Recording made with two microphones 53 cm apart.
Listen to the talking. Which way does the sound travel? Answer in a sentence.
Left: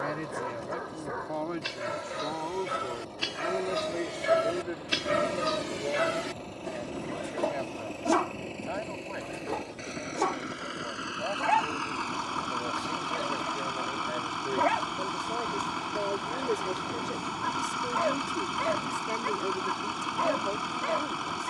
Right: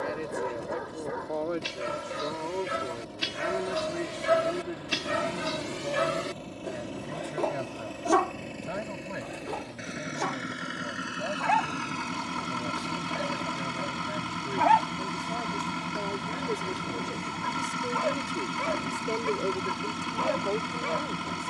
You can hear the talking move from left to right and back again.